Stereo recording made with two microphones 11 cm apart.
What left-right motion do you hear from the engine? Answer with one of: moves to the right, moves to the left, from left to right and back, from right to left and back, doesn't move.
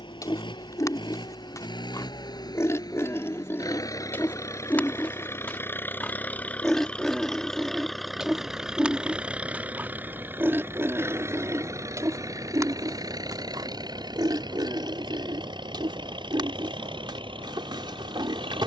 moves to the right.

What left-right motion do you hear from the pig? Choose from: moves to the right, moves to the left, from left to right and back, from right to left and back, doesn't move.
moves to the right.